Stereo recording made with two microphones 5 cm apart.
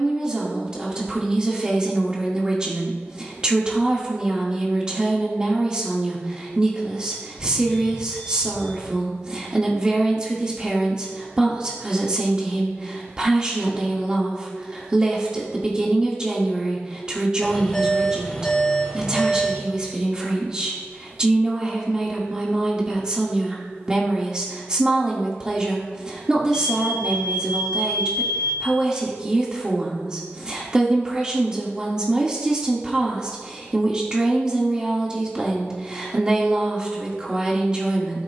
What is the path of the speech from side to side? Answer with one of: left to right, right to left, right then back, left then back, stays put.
stays put.